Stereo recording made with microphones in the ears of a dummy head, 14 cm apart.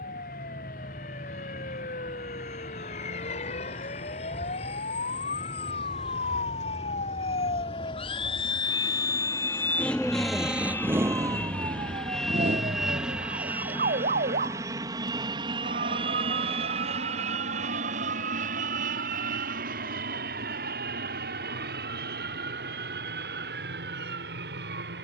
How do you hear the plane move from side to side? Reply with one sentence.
In this clip you hear the plane travel towards the right.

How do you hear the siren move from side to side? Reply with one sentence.
In this clip you hear the siren move to the right.